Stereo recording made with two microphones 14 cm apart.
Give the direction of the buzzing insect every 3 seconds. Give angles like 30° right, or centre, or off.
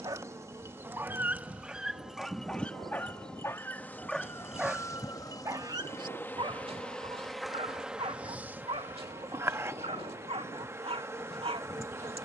10° right, 20° left, centre, 20° right.